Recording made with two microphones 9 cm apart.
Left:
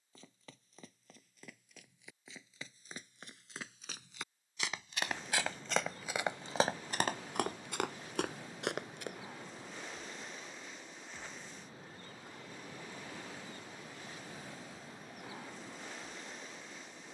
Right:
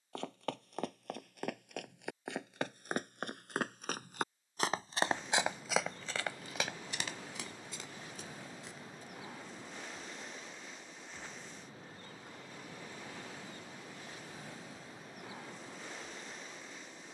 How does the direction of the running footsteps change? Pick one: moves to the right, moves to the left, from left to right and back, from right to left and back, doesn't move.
moves to the left.